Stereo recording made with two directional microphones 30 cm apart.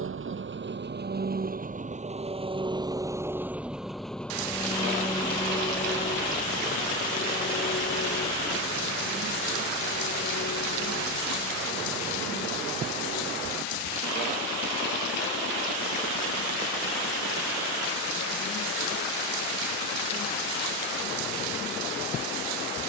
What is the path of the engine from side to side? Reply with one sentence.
In this clip you hear the engine travel towards the left.